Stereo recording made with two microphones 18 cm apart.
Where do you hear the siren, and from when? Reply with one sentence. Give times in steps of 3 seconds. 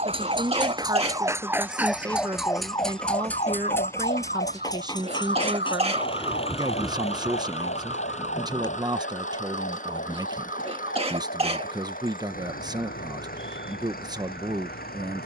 In this clip you hear the siren in the centre from 0 s and on the left from 3 s.